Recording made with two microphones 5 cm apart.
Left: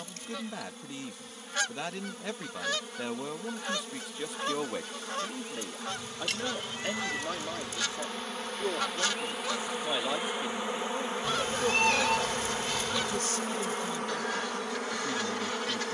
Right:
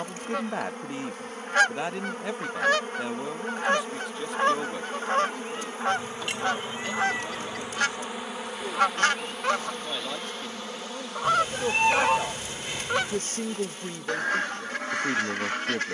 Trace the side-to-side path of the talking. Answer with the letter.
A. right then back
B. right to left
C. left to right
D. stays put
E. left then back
E.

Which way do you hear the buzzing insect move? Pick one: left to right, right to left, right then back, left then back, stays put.
right to left.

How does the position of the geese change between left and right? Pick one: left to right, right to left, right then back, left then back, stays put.
stays put.